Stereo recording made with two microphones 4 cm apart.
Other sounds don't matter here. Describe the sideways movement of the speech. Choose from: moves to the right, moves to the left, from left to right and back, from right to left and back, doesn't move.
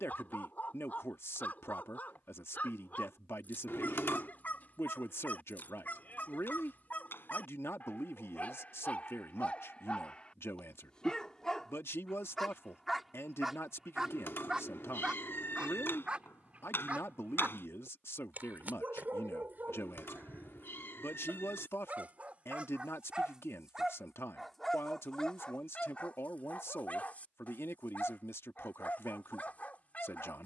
doesn't move.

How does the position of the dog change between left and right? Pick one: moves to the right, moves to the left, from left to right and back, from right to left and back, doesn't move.
from left to right and back.